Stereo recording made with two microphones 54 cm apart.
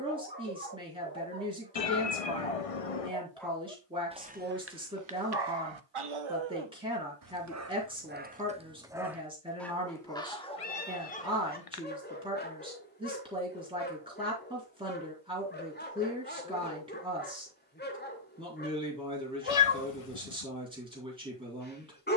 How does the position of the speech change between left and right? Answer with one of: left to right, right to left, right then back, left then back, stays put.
stays put.